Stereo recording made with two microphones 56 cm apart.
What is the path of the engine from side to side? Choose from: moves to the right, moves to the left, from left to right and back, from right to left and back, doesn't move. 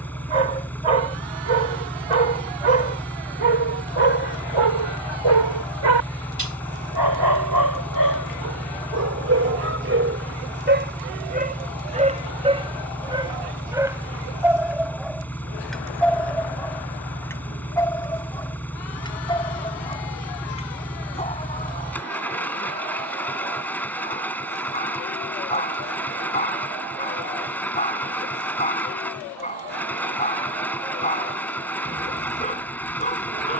doesn't move.